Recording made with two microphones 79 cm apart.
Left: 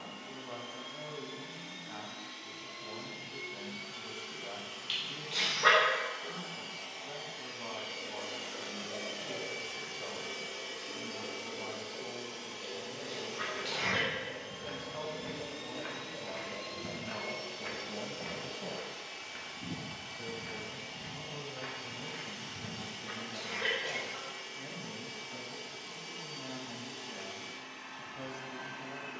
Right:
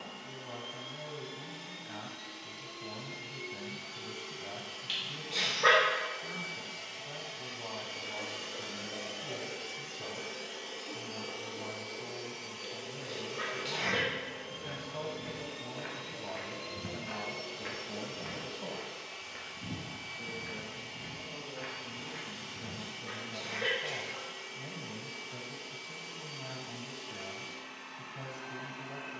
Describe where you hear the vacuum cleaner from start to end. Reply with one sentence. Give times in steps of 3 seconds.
You can hear the vacuum cleaner on the right from 0 s and on the left from 9 s.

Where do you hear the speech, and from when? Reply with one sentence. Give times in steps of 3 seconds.
You can hear the speech on the right from 0 s, in the centre from 18 s and on the right from 24 s.